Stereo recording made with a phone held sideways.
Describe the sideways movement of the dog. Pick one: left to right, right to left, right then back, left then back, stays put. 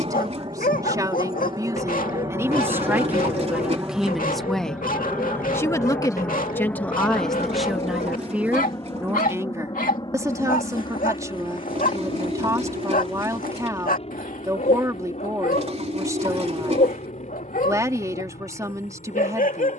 stays put.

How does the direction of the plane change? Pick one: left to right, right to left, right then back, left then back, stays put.
right to left.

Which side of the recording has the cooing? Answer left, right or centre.
right.